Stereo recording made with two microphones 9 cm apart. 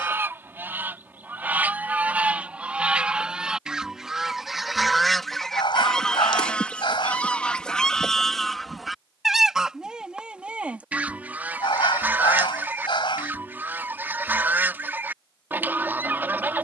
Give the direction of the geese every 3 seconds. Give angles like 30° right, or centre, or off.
20° right, centre, 10° left, 10° right, 20° right, 20° right.